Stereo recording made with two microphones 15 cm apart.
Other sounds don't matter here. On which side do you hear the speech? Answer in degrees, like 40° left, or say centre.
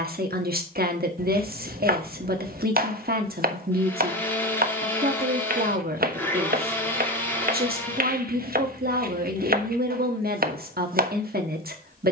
80° right.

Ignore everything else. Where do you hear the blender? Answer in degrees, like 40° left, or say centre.
10° left.